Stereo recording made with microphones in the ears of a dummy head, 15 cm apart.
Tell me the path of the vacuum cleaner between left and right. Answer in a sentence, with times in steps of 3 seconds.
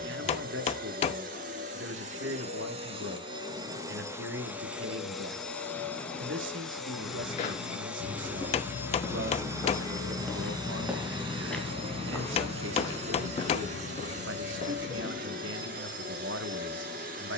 In this clip you hear the vacuum cleaner on the right from 0 s, in the centre from 3 s and on the right from 9 s.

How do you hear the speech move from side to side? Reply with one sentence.
You can hear the speech stay put.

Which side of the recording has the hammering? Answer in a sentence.
You can hear the hammering on the left.